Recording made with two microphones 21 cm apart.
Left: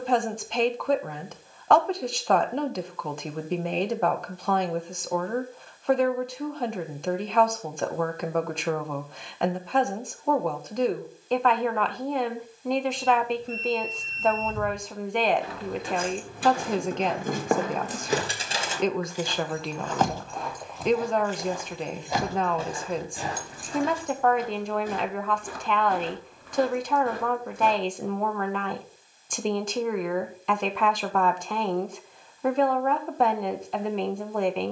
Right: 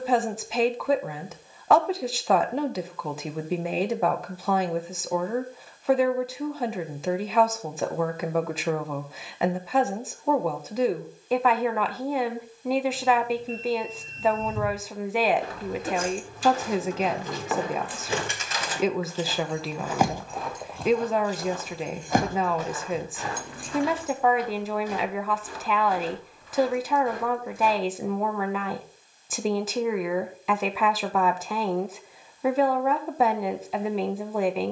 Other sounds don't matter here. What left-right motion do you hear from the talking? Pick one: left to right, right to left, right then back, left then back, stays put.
stays put.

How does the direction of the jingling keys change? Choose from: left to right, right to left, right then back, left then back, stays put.
left to right.